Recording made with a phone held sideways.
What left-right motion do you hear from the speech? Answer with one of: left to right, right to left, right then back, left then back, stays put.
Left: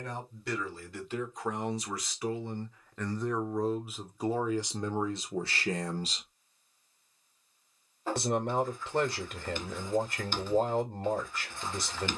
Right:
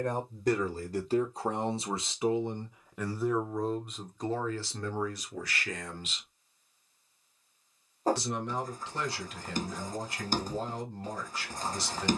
right to left.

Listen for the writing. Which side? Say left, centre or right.
right.